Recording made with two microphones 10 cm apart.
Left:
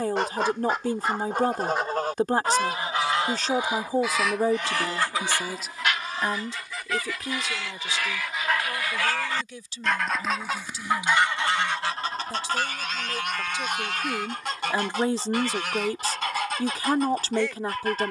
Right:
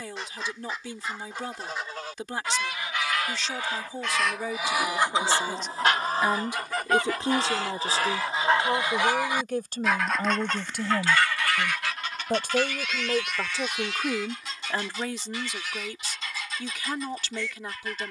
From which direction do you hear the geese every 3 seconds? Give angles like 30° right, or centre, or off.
50° left, centre, 40° right, 10° left, 50° left, 60° left.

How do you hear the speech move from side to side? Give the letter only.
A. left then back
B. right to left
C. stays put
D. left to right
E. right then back
E.